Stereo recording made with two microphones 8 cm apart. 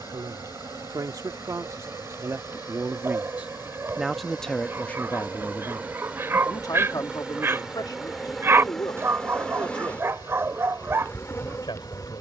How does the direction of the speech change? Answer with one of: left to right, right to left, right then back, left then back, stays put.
right to left.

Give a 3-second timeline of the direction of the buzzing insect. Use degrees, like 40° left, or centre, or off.
50° right, 30° right, 10° right, 20° left.